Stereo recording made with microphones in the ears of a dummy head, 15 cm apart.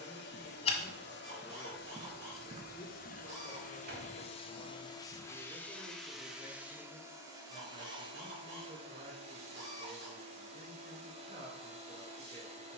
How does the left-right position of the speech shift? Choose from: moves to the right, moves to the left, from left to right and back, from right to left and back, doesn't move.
moves to the right.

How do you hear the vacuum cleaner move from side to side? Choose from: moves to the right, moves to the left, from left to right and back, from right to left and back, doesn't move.
moves to the right.